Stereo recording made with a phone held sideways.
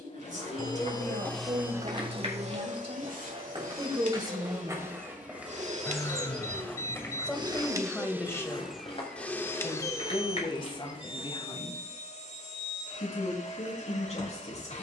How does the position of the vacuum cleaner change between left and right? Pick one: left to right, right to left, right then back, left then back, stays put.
right then back.